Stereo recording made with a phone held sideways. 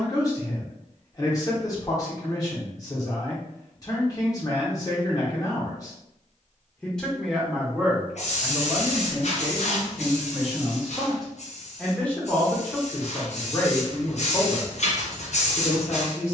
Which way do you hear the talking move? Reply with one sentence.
You can hear the talking go right and come back.